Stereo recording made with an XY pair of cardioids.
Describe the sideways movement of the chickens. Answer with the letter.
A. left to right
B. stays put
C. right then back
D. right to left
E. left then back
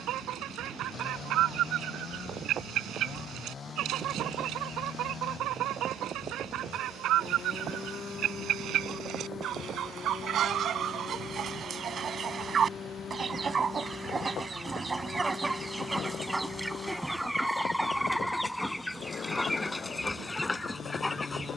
D.